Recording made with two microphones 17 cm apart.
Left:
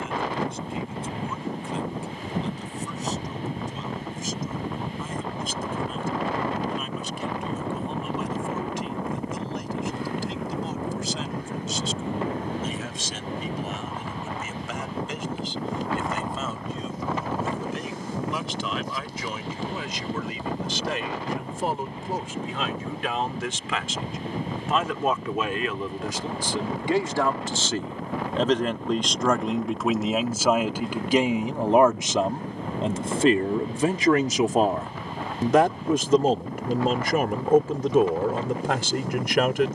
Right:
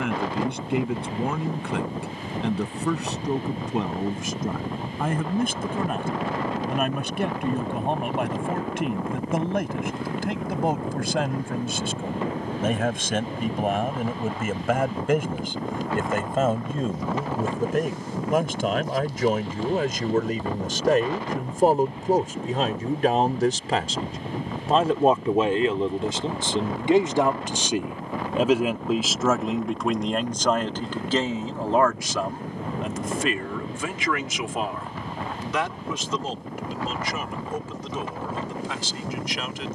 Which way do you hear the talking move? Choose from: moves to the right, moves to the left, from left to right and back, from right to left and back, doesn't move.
moves to the left.